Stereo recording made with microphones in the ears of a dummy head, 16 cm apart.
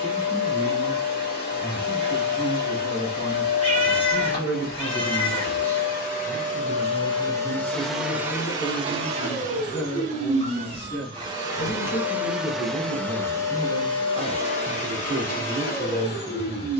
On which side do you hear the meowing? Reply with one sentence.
You can hear the meowing on the left.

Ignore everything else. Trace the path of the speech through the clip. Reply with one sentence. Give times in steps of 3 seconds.
You can hear the speech on the right from 0 s, in the centre from 3 s, on the left from 6 s, in the centre from 12 s and on the right from 15 s.